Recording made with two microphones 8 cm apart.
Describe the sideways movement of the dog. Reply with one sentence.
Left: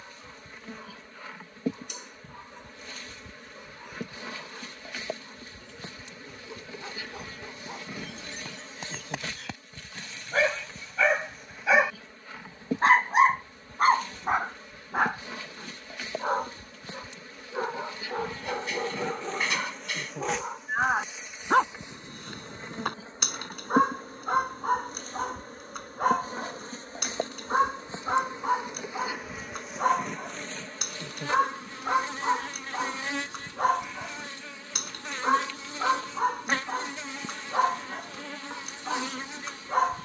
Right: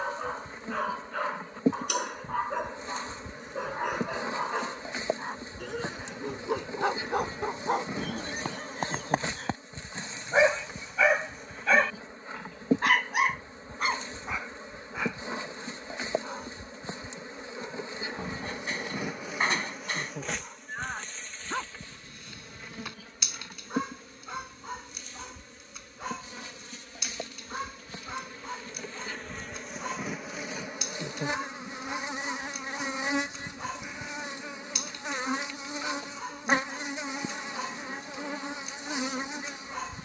In this clip you hear the dog go from the right side to the left.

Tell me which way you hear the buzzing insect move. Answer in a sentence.
In this clip you hear the buzzing insect move from right to left and back again.